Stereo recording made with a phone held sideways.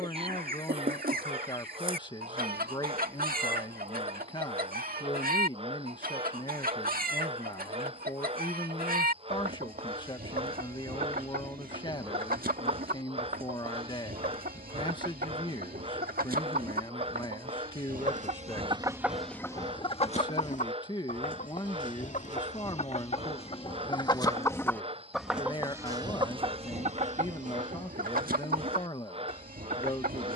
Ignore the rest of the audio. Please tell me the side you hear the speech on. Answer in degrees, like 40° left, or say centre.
30° left.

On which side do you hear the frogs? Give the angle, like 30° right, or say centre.
40° right.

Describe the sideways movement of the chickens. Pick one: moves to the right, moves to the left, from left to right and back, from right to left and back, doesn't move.
from right to left and back.